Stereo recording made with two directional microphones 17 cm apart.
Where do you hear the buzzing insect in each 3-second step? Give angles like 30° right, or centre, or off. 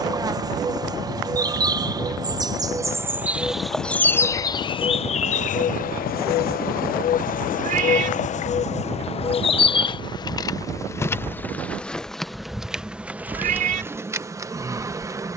20° right, 20° left, 50° left, 20° left, 10° right.